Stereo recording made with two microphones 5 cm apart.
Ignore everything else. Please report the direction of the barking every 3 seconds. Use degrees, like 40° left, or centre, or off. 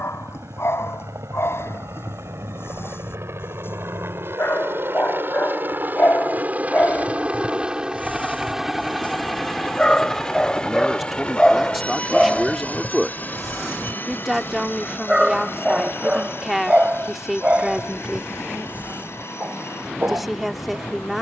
60° left, 50° left, 30° left, 10° left, centre, 20° right, 30° right.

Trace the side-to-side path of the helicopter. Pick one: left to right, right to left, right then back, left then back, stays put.
right to left.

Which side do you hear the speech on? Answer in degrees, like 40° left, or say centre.
centre.